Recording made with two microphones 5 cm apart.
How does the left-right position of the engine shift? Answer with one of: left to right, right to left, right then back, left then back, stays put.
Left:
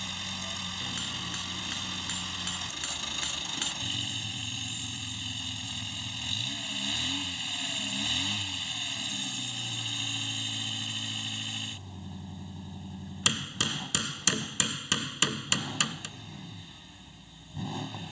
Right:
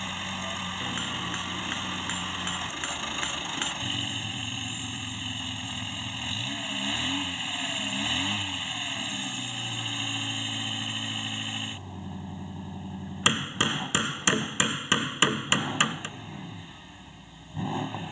stays put.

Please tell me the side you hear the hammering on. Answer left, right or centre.
right.